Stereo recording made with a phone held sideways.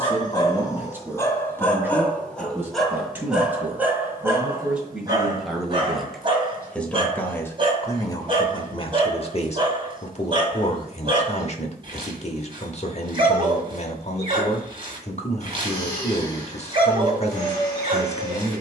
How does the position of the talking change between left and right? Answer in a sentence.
You can hear the talking move from right to left.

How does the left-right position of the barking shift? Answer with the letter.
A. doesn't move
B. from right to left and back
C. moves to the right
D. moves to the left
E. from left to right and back
C.